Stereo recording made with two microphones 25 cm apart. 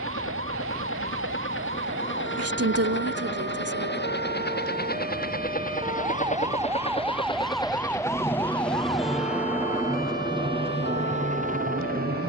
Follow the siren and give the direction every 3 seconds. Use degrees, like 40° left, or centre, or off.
50° right, 40° right, centre, 40° left.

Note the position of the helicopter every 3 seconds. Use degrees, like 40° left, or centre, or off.
50° left, 40° left, 20° left, 20° right.